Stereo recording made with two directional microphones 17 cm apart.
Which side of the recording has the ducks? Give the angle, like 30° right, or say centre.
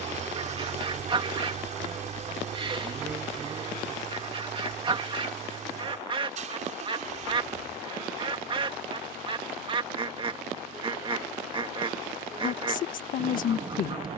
30° right.